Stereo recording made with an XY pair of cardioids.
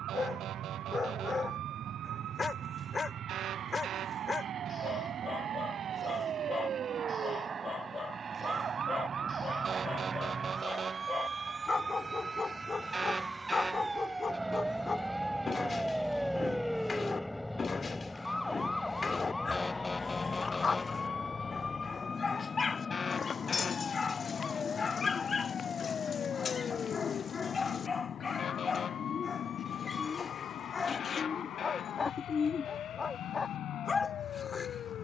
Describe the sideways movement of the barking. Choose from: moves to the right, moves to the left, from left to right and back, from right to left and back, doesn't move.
doesn't move.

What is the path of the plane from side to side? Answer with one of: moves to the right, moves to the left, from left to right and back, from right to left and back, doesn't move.
moves to the left.